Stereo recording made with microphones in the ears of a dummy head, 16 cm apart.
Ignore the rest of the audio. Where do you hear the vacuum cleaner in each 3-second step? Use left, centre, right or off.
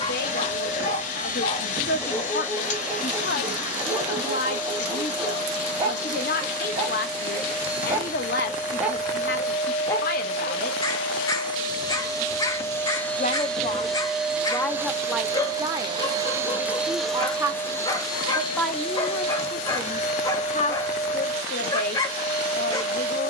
left, left, left, left, centre, centre, left, left.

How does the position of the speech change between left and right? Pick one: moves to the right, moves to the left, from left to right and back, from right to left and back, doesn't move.
from left to right and back.